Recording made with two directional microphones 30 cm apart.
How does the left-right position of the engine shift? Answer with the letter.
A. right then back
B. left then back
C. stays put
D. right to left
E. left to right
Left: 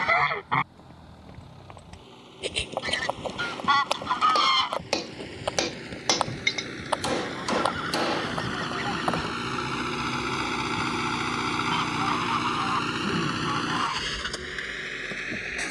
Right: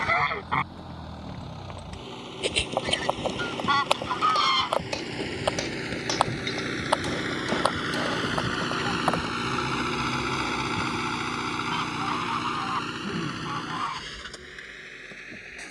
D.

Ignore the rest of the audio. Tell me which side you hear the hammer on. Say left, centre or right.
left.